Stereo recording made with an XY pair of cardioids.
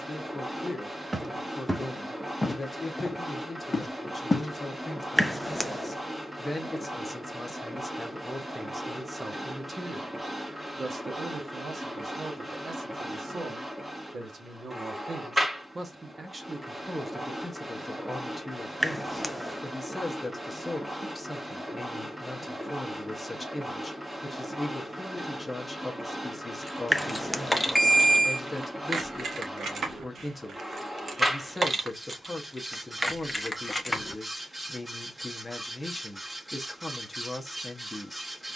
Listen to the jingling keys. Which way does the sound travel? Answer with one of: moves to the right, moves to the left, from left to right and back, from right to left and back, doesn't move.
from left to right and back.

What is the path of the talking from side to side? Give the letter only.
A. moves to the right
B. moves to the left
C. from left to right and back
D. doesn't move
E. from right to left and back
C.